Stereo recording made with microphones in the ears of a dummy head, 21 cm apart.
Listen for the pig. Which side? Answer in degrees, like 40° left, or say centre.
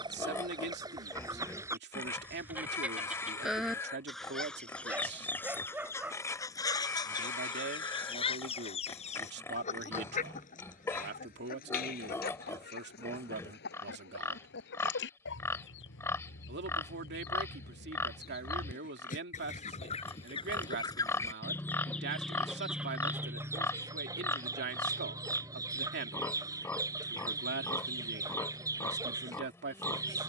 10° left.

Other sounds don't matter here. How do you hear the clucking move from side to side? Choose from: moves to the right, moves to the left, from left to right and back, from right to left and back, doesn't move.
from right to left and back.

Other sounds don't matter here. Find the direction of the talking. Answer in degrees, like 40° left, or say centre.
50° right.